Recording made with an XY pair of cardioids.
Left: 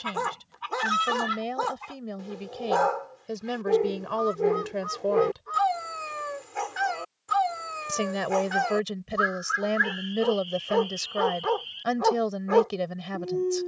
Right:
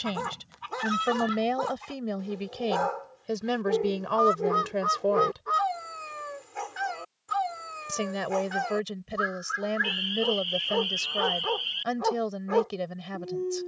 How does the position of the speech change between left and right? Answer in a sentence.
You can hear the speech go from the right side to the left.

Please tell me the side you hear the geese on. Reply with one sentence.
In this clip you hear the geese on the right.